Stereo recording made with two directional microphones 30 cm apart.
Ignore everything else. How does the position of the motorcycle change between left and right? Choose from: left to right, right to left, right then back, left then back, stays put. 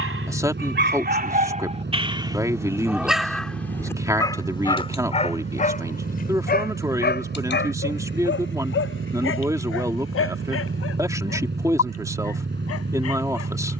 stays put.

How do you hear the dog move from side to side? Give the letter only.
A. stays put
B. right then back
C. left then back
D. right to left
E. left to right
D.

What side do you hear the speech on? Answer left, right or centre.
centre.